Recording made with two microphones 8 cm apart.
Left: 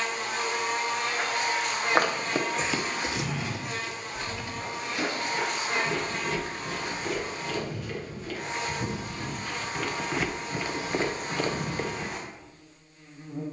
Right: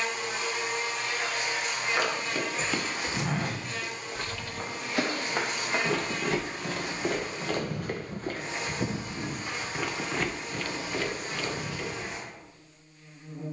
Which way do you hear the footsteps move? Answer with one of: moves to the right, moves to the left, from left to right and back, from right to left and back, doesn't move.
from left to right and back.